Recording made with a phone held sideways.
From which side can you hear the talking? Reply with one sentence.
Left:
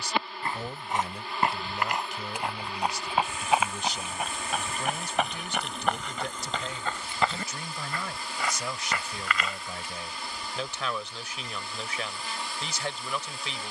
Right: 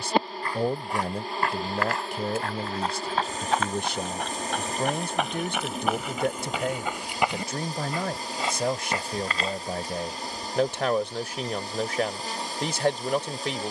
In this clip you hear the talking on the right.